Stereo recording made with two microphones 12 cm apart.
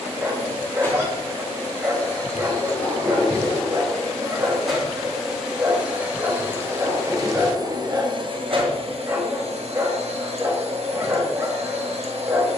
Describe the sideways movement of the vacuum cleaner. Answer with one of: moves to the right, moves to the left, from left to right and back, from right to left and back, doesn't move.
moves to the right.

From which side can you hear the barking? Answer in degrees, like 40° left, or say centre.
20° right.